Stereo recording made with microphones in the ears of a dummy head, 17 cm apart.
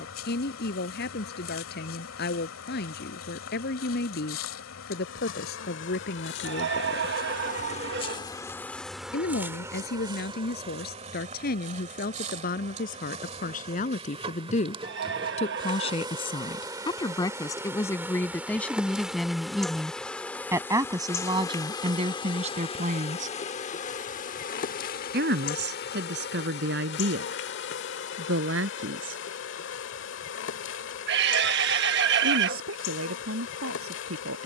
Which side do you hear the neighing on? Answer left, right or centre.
right.